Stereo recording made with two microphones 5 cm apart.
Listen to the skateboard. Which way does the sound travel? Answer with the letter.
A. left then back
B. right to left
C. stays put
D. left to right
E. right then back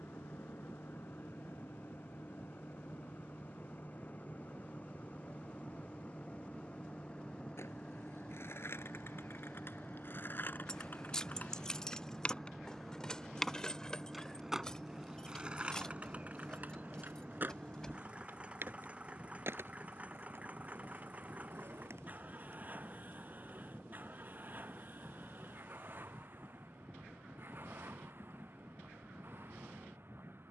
D.